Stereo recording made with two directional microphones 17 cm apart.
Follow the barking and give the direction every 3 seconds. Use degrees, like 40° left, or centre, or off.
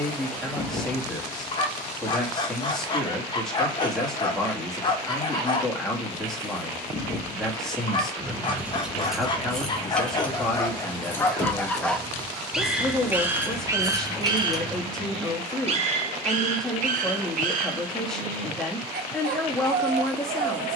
30° left, 30° left, 30° left, 20° left, 20° right, 50° right, 60° right.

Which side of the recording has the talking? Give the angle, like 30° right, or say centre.
centre.